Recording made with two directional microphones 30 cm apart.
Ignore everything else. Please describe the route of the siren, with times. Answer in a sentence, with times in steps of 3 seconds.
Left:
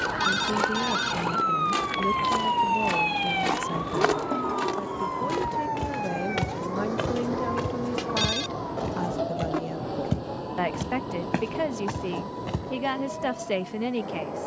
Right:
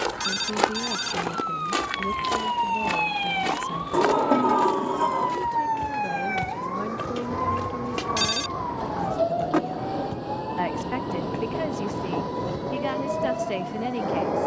In this clip you hear the siren on the left from 0 s and on the right from 3 s.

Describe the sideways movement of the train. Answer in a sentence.
In this clip you hear the train go from the left side to the right.